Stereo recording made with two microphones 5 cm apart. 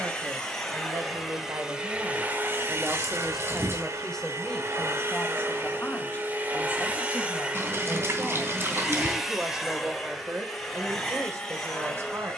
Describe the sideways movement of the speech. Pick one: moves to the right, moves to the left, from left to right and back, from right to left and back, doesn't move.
from right to left and back.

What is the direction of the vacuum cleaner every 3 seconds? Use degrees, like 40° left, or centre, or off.
10° right, 50° right, 20° right, centre.